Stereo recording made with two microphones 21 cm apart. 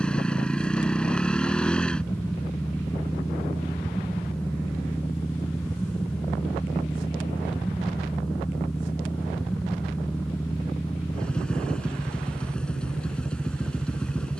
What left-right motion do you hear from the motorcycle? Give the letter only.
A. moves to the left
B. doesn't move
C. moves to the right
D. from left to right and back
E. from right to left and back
B.